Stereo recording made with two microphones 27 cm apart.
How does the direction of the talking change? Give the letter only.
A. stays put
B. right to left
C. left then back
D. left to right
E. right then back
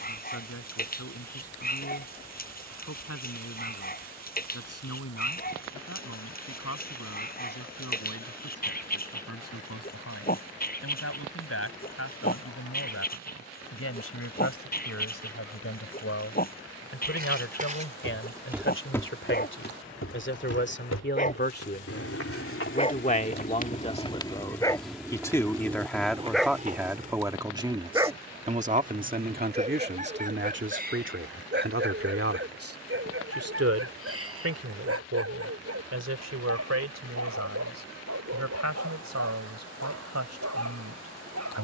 D.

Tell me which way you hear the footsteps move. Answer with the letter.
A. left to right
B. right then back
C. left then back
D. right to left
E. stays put
C.